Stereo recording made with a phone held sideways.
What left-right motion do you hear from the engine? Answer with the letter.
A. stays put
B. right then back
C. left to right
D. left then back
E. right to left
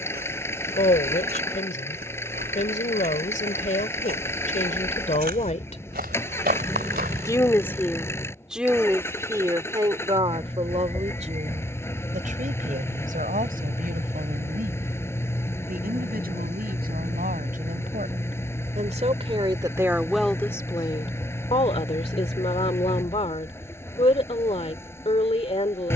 A.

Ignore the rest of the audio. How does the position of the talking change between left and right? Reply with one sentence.
You can hear the talking go right and come back.